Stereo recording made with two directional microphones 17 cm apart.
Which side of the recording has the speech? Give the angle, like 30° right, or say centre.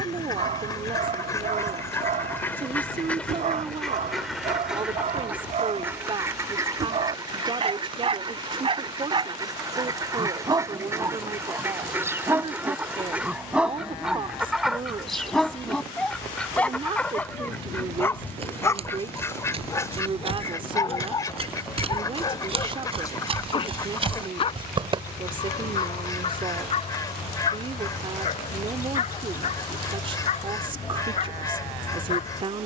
30° right.